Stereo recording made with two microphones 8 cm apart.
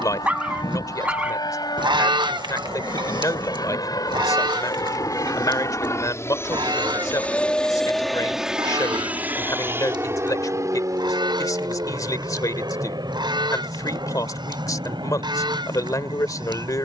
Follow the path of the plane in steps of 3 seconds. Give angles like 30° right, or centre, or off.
80° left, 60° left, 10° left, 30° right, 50° right, 60° right.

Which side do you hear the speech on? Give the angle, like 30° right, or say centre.
50° left.